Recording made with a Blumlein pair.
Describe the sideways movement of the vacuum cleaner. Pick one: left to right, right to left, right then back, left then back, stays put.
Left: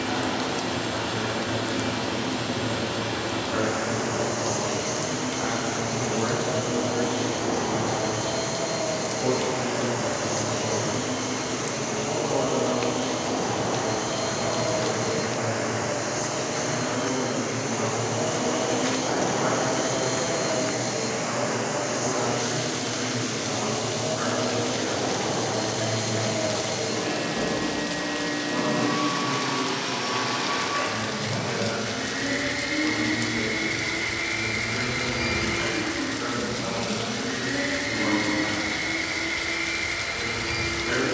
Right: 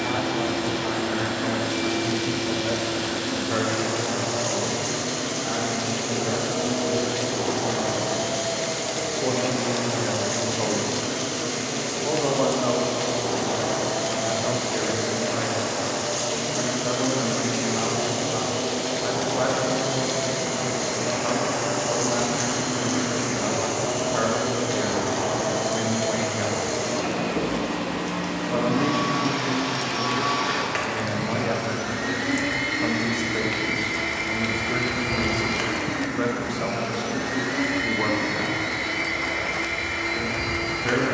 left then back.